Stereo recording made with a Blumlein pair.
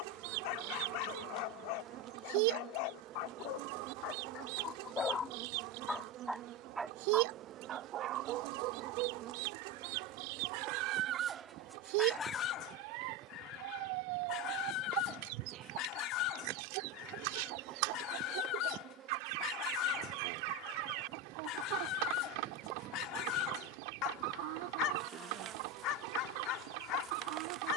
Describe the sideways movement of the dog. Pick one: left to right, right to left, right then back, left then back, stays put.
right then back.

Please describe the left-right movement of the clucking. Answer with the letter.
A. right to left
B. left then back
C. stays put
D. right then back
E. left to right
C.